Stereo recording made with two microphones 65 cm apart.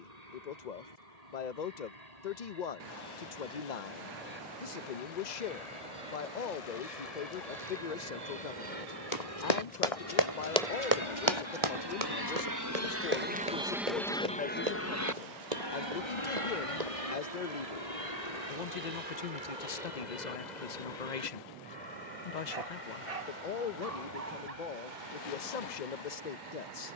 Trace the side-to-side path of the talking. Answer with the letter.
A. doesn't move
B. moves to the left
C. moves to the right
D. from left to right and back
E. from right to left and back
A.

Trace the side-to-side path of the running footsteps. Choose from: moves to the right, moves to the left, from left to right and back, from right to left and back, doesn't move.
moves to the right.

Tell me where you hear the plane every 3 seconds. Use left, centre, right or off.
right, right, right, right, centre, left, left, left, left.